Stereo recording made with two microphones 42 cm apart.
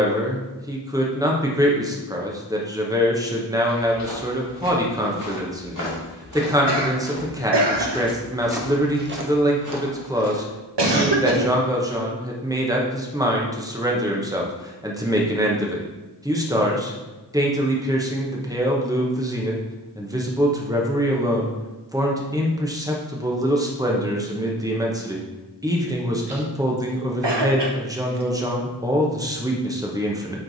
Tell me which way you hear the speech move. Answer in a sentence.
In this clip you hear the speech stay in one place.